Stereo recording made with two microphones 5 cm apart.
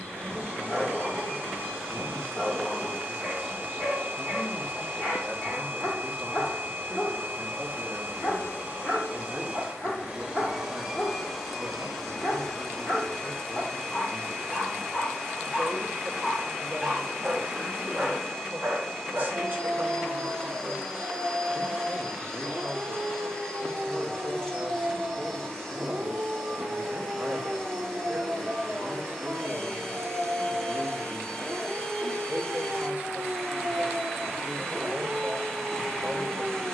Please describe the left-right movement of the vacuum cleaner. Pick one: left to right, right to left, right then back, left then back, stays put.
right to left.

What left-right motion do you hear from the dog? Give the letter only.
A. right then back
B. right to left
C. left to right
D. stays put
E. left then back
C.